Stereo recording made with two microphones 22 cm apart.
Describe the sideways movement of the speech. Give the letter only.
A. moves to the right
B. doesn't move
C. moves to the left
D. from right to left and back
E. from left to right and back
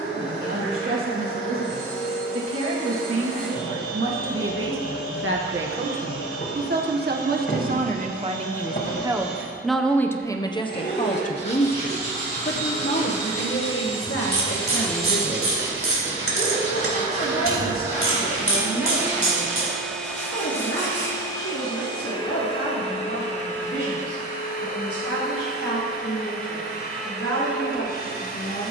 C.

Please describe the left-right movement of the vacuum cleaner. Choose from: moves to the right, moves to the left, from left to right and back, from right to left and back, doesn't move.
from left to right and back.